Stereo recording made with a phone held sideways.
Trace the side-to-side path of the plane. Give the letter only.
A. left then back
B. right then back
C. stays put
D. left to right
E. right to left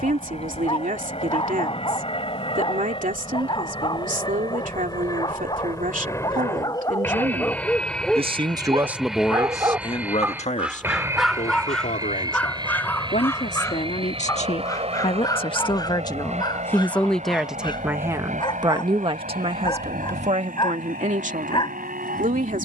D.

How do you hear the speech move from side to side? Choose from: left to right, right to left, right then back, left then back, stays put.
left then back.